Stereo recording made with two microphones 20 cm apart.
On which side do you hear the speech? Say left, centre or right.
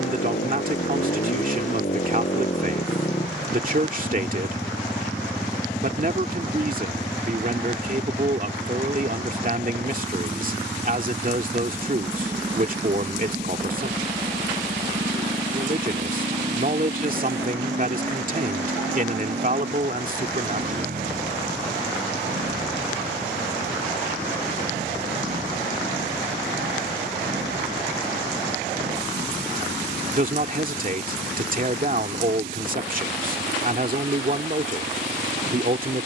right.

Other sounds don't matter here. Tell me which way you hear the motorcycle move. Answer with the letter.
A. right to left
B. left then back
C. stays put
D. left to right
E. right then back
D.